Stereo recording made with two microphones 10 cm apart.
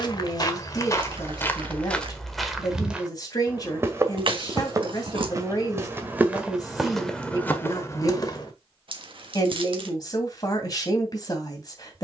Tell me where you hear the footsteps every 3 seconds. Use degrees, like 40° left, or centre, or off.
20° left, 30° right, 10° left, off.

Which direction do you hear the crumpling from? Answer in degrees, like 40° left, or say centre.
60° right.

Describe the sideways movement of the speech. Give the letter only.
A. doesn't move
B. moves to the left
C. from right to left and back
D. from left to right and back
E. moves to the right
A.